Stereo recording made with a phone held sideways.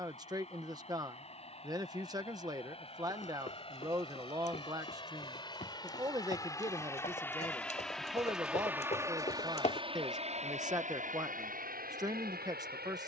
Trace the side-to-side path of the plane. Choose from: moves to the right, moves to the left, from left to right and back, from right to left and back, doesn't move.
moves to the right.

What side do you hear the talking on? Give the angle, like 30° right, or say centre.
20° right.